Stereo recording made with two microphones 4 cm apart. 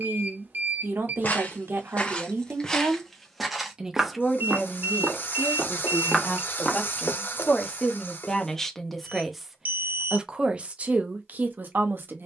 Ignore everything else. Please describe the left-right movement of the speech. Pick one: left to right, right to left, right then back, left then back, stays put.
left then back.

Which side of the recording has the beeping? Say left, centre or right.
right.